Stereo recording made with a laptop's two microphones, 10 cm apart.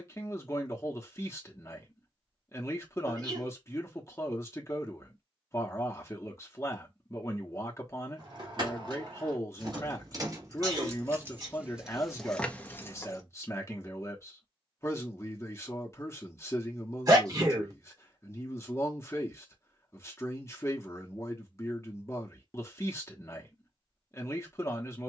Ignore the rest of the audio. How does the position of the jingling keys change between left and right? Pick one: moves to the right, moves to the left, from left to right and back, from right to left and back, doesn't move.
moves to the left.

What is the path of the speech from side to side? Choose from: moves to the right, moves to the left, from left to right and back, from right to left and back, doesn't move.
doesn't move.